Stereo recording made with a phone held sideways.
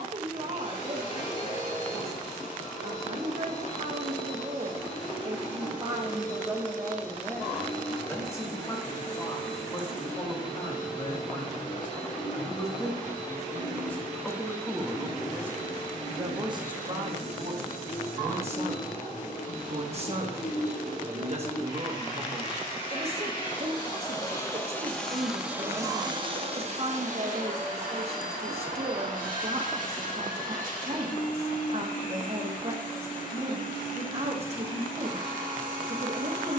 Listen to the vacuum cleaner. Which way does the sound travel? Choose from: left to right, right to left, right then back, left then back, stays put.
left to right.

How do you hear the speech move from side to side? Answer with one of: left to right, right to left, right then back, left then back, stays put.
left then back.